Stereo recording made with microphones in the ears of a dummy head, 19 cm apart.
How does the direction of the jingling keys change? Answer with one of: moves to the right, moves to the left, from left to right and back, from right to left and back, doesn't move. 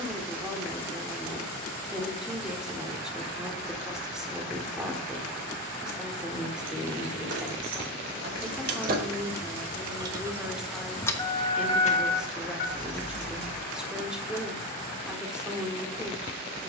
moves to the left.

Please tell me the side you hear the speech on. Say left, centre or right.
centre.